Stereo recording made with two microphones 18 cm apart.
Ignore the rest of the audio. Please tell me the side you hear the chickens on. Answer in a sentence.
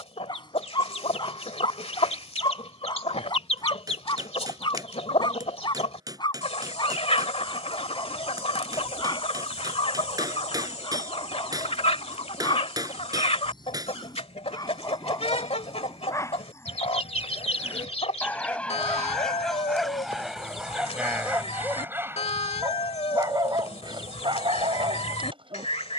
You can hear the chickens on the left.